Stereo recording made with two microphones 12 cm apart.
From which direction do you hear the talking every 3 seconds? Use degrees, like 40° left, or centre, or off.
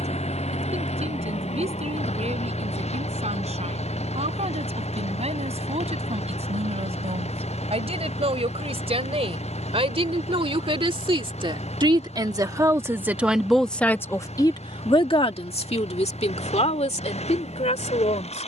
70° right, 70° right, 70° right, 50° right, centre, 70° left.